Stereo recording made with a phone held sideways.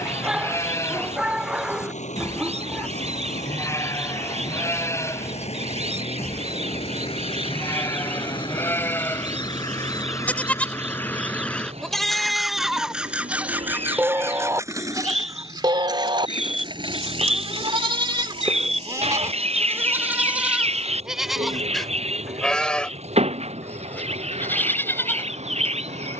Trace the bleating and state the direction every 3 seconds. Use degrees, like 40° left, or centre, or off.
20° left, 20° left, 20° left, 10° left, 10° right, 40° right, 20° right, centre, 20° left.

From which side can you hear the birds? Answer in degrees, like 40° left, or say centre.
60° right.